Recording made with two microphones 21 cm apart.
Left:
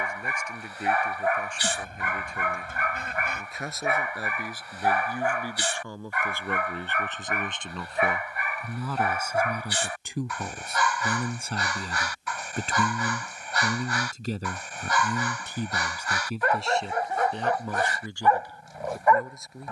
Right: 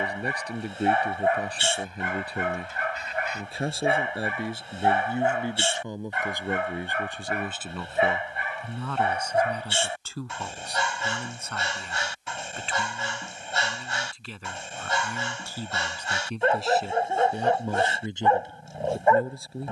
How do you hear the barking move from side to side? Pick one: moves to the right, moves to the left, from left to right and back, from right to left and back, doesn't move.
doesn't move.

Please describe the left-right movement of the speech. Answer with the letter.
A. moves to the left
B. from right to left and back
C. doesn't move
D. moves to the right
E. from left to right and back
B.